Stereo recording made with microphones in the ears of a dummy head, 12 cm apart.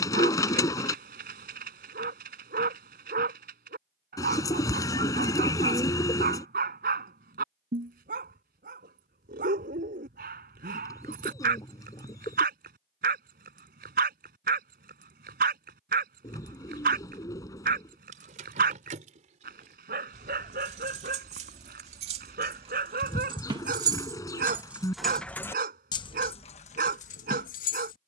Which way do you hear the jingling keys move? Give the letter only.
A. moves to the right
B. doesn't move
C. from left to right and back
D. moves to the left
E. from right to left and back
D.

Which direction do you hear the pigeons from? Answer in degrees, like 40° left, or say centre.
30° left.